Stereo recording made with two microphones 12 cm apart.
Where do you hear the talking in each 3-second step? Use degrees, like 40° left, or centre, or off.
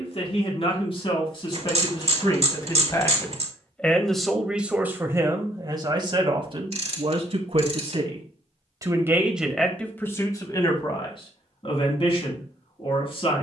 40° left, 10° right, 50° right, 20° left, 50° left.